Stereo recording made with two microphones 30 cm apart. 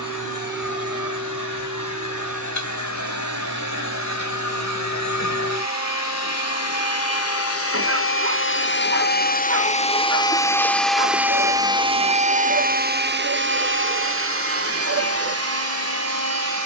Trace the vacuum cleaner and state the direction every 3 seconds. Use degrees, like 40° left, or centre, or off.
70° left, 70° left, 50° left, 10° left, 40° right, 60° right.